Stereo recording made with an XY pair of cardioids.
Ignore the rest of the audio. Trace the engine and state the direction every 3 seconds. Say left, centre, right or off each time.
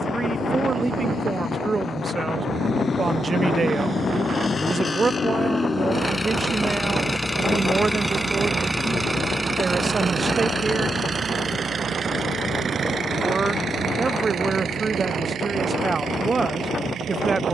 left, left, centre, right, right, right.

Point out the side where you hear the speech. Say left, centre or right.
right.